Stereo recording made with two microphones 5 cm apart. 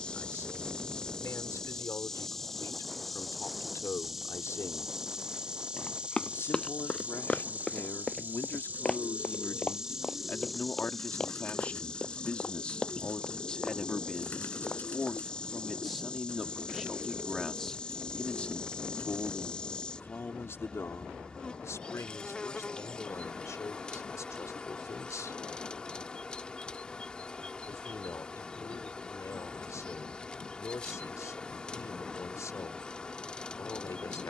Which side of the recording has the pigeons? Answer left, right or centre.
left.